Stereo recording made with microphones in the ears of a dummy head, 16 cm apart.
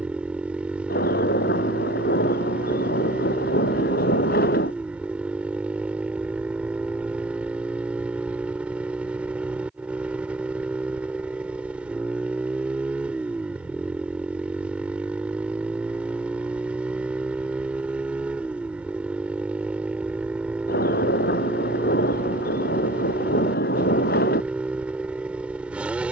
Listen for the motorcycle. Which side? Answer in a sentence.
In this clip you hear the motorcycle in the centre.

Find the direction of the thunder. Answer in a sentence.
You can hear the thunder on the left.